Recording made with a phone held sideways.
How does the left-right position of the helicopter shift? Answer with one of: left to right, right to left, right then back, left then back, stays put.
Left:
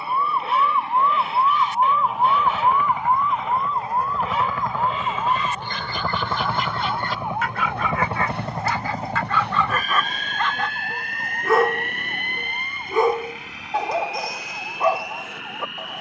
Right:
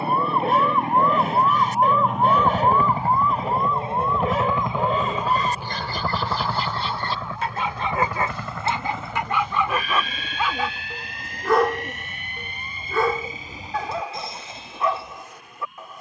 right to left.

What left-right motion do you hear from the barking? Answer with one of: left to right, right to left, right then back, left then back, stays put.
right to left.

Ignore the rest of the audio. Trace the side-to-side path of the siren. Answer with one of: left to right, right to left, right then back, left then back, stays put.
right to left.